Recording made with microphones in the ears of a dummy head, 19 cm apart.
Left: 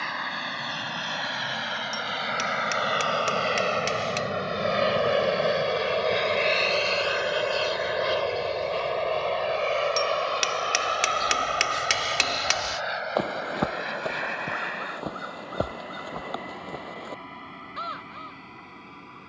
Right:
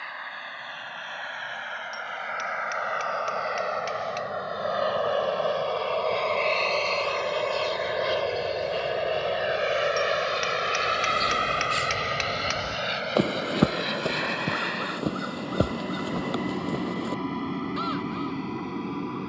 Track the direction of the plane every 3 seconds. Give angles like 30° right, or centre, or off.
60° left, 40° left, 10° left, 20° right, 40° right, 50° right, 60° right.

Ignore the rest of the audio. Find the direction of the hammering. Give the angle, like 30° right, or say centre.
60° left.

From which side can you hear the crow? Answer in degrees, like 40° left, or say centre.
30° right.